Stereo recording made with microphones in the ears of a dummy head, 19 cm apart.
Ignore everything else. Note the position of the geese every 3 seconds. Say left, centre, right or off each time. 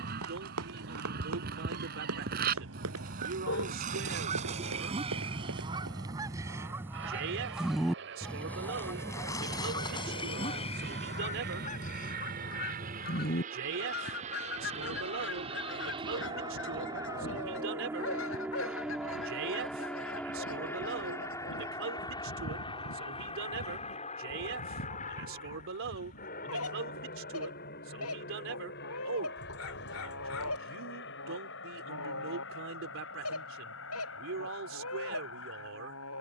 right, right, centre, left, left, left, left, left, left, left, left, left.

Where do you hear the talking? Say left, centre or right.
right.